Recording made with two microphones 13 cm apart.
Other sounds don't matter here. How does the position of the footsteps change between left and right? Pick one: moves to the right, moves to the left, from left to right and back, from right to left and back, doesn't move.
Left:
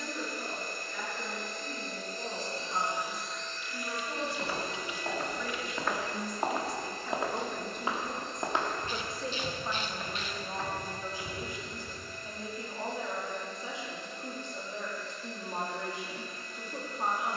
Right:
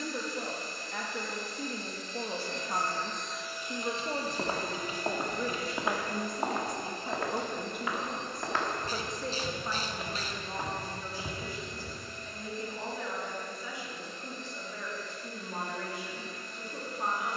from right to left and back.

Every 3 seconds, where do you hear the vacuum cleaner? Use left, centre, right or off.
left, right, right, right, right, right.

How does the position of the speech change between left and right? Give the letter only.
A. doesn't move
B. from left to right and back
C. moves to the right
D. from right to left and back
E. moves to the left
E.